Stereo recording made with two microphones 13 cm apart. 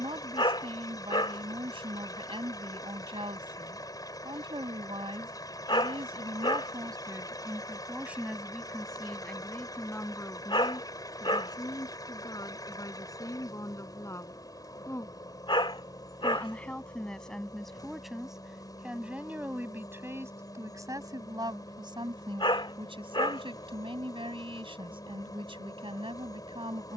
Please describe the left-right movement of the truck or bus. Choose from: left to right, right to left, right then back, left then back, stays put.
stays put.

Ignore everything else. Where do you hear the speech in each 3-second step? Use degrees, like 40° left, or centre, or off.
40° right, 40° right, 20° right, 20° left, 30° left, 10° left, 10° right, 40° right, 40° right.